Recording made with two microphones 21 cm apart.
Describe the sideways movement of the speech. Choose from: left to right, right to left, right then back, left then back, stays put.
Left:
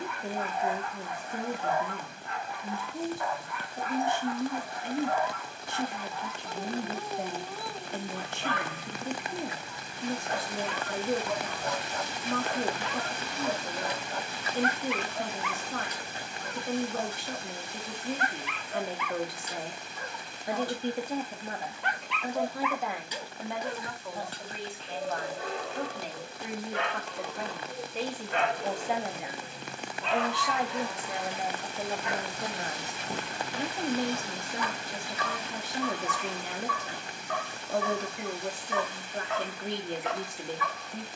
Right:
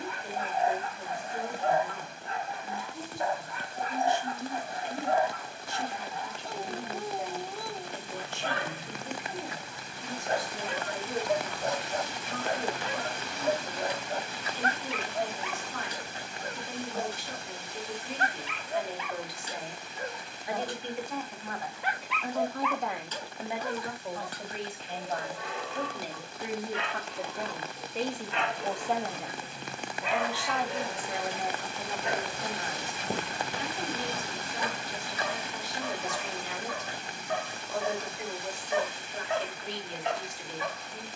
right then back.